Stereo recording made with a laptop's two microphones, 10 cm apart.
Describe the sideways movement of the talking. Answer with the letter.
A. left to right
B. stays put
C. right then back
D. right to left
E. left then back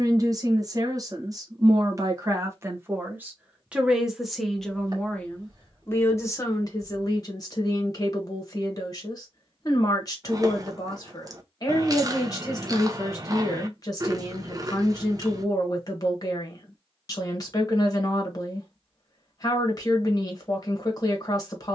D.